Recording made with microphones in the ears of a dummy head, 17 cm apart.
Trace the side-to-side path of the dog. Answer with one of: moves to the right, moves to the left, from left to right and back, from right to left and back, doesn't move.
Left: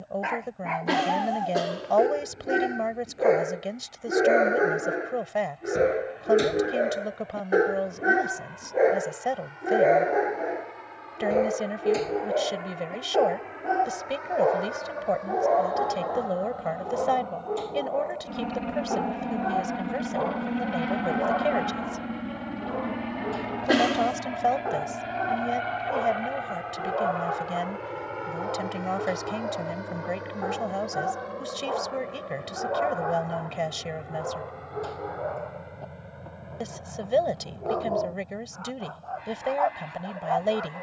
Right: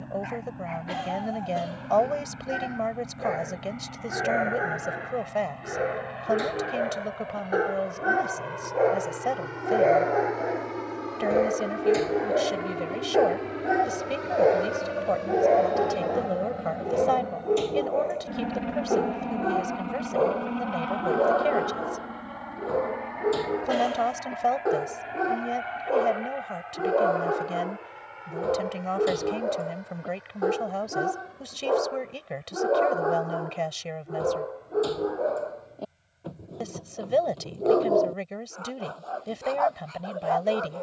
moves to the right.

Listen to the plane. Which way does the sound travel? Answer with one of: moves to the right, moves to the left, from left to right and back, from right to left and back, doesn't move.
moves to the left.